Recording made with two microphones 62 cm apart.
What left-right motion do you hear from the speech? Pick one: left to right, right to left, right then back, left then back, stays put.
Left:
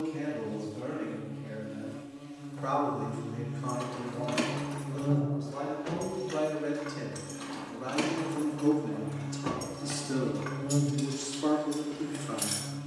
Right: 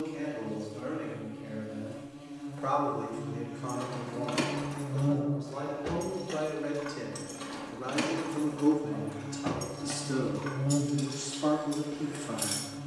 left to right.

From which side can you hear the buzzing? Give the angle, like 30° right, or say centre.
20° right.